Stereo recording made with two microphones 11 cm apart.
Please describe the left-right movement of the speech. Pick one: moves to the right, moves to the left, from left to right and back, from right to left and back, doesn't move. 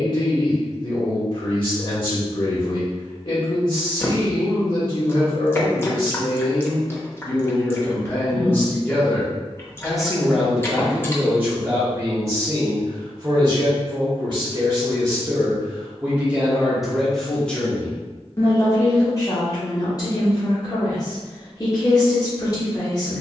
from left to right and back.